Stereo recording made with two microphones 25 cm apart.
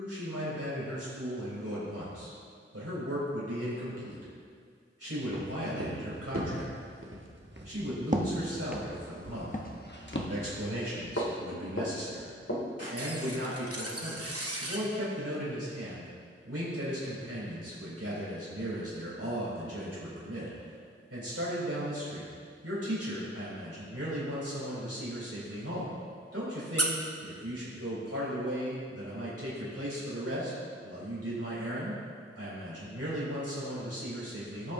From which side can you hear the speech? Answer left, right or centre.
right.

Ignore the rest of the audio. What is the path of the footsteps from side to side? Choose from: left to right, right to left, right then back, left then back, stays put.
right to left.